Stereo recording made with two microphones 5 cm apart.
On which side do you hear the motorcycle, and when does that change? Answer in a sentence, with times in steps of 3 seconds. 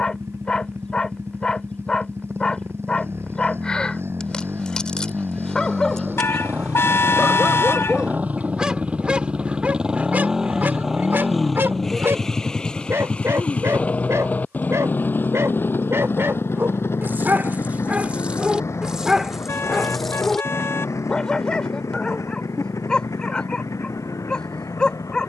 You can hear the motorcycle on the right from 0 s, in the centre from 9 s and on the left from 12 s.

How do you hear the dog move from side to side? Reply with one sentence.
You can hear the dog go right and come back.